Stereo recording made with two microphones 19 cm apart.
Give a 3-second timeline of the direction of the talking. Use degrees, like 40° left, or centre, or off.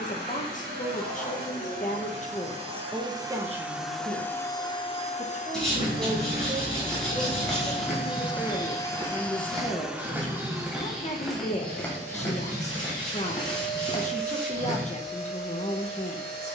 40° left, 40° right, 10° right, 30° left, 40° left, 40° left.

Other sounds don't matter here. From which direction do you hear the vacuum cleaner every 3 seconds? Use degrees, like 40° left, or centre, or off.
50° right, 20° left, 40° left, 10° right, 50° right, 50° right.